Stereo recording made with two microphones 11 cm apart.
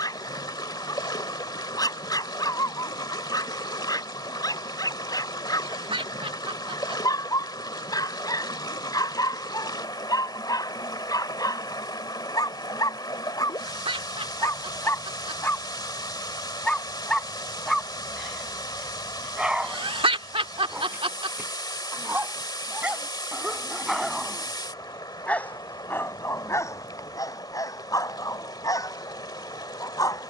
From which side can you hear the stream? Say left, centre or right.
left.